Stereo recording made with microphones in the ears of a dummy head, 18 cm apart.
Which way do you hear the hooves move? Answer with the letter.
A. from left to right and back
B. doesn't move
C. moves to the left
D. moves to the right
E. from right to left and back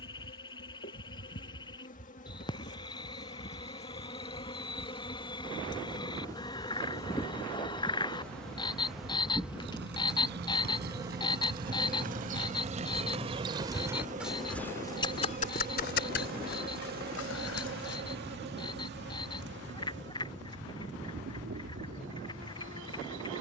C.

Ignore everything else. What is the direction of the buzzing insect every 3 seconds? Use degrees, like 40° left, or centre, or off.
40° left, 30° left, 10° left, 10° right, 30° right, 50° right, 60° right, 70° right.